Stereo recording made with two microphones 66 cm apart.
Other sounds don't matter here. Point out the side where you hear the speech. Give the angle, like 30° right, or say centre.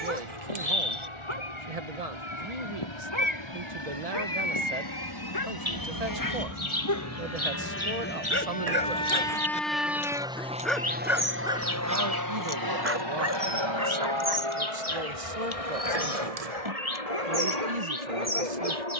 70° right.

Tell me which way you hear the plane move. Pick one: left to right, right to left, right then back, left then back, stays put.
left to right.